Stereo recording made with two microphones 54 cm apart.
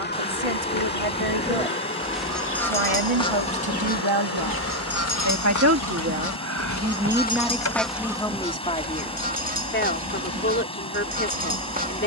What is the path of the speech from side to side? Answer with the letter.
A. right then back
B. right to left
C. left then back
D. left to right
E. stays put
B.